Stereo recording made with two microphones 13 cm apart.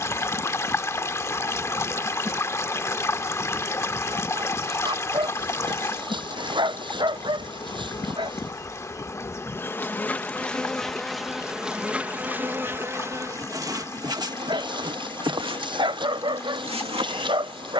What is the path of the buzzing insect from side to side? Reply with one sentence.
In this clip you hear the buzzing insect move from right to left and back again.